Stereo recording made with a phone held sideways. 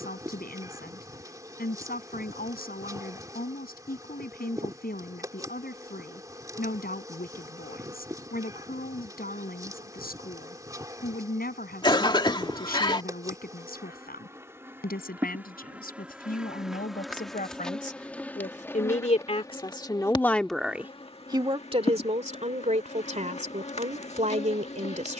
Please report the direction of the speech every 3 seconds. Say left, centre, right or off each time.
left, left, left, left, left, left, left, right, right.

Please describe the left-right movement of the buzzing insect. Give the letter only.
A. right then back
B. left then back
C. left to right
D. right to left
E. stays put
D.